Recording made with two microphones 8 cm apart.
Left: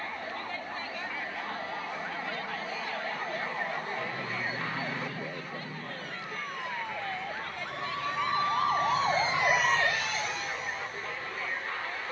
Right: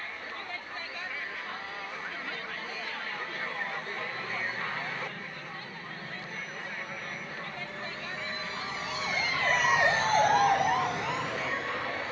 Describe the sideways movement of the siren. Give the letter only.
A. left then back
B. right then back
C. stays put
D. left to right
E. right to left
D.